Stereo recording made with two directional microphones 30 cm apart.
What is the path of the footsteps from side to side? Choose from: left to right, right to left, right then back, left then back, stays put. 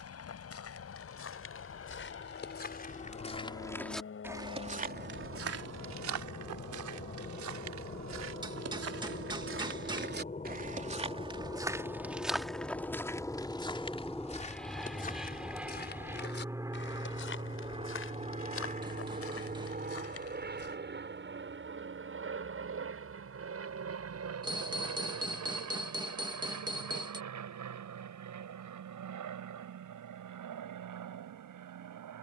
right then back.